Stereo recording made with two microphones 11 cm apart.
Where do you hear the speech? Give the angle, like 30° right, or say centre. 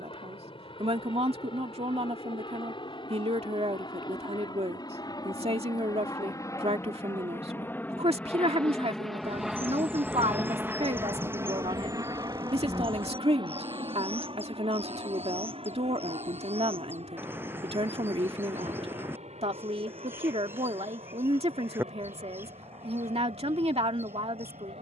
70° right.